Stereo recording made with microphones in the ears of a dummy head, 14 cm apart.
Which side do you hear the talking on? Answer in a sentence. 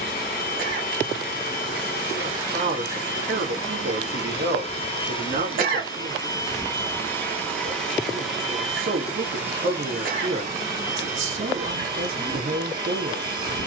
In this clip you hear the talking on the right.